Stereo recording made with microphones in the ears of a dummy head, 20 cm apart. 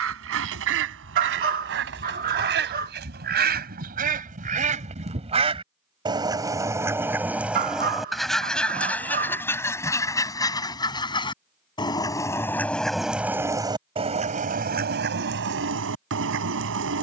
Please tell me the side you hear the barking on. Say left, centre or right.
right.